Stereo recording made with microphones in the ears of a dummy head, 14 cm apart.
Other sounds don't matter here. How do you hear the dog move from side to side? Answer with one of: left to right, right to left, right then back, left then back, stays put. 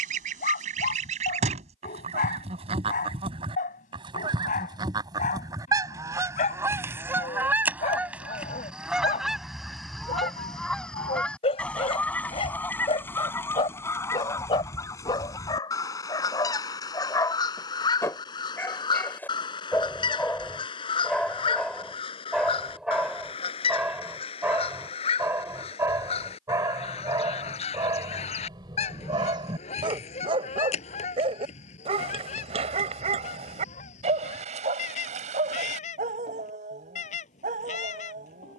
left to right.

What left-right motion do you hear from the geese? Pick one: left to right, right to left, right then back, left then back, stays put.
right to left.